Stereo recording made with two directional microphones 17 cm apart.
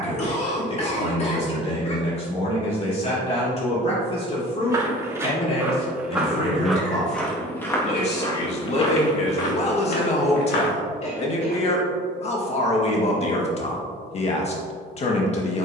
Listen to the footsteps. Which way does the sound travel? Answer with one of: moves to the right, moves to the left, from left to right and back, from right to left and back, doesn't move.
moves to the left.